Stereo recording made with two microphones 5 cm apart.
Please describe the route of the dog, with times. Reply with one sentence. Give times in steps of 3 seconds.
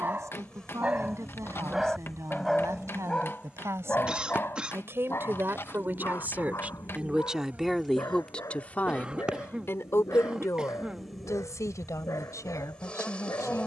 You can hear the dog in the centre from 0 s and on the left from 3 s.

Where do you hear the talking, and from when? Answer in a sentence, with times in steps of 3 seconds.
In this clip you hear the talking on the right from 0 s, in the centre from 6 s and on the left from 9 s.